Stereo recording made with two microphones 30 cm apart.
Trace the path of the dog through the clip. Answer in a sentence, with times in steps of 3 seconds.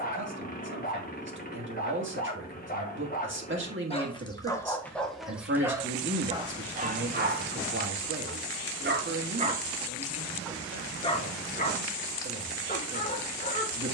In this clip you hear the dog on the left from 0 s, in the centre from 3 s, on the right from 6 s, in the centre from 9 s and on the left from 12 s.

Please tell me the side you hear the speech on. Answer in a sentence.
In this clip you hear the speech on the right.